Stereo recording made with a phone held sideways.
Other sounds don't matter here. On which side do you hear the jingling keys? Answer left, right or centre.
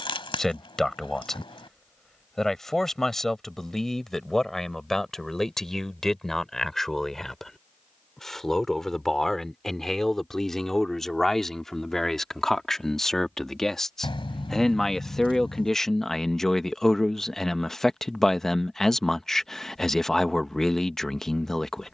left.